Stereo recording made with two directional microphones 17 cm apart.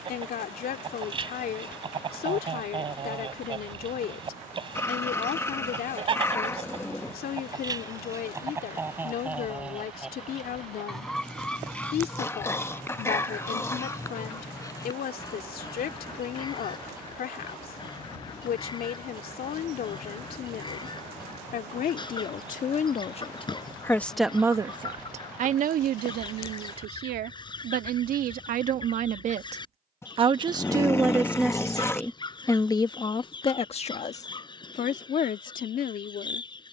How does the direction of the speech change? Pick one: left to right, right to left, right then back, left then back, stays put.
right then back.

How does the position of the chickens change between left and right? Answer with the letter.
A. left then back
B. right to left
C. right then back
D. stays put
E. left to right
B.